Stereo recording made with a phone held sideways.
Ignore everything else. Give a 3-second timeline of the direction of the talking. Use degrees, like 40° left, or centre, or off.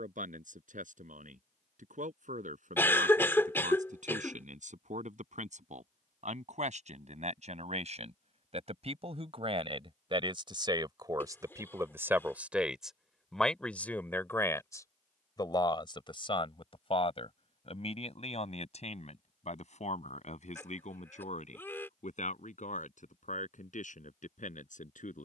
70° right, 70° right, 60° right, 40° right, centre, 40° left, 60° left, 70° left, 70° left.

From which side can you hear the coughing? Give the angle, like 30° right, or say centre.
20° left.